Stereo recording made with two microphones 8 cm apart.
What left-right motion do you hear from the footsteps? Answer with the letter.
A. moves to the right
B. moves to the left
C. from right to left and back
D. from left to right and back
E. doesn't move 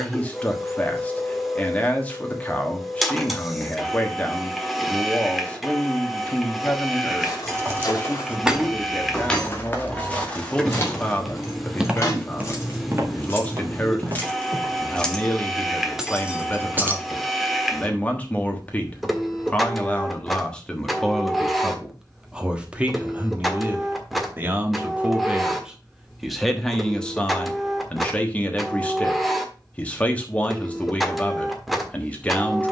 A.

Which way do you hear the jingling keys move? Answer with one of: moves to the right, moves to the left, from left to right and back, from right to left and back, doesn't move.
from right to left and back.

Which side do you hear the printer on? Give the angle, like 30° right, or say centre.
centre.